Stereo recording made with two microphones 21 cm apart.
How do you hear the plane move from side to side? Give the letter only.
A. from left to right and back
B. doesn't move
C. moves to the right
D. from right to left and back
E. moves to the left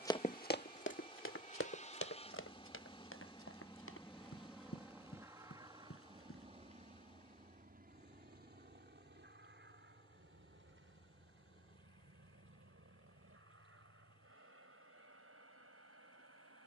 C.